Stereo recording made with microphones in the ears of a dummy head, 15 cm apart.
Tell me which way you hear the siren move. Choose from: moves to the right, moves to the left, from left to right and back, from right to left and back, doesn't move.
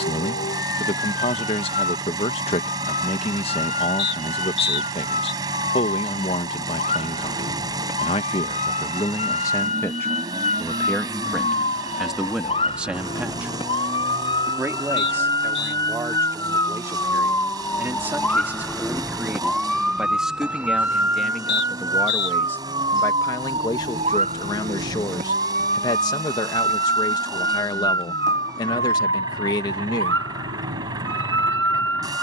moves to the right.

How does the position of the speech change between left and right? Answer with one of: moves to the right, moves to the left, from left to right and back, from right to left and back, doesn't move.
from left to right and back.